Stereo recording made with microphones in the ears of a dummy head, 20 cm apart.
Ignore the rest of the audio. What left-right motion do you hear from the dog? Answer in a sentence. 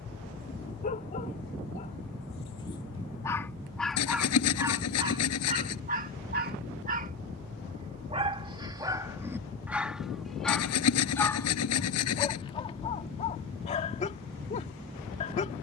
In this clip you hear the dog move from left to right and back again.